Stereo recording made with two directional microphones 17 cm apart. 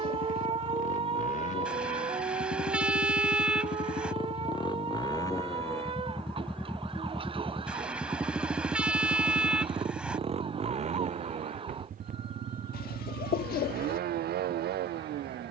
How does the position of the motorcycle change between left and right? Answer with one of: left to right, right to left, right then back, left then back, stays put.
left to right.